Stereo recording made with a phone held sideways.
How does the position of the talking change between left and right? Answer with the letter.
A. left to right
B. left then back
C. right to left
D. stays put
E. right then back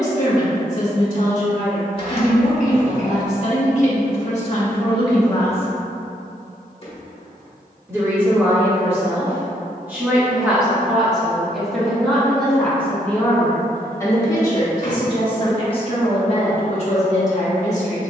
E.